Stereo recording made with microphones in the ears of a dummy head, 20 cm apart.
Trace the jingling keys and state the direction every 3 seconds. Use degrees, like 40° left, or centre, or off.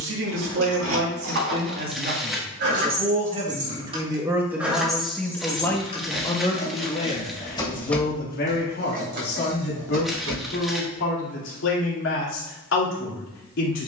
60° right, 10° right, 10° left, 60° right, off.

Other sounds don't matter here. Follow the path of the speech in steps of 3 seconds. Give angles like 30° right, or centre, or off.
50° right, 10° right, 30° left, 50° left, 60° left.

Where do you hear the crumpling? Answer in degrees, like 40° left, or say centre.
centre.